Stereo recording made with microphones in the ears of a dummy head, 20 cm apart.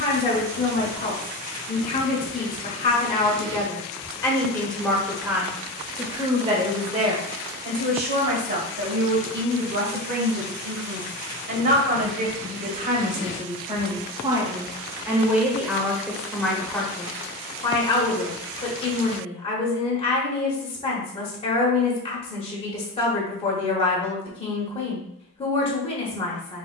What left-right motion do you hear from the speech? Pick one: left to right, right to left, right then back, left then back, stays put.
right then back.